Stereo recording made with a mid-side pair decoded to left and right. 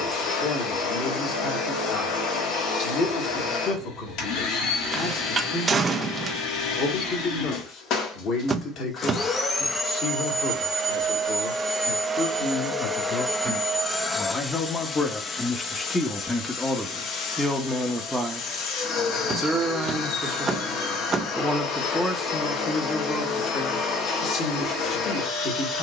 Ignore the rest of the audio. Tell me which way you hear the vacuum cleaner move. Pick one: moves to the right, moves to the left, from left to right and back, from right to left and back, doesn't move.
from left to right and back.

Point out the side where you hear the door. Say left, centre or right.
right.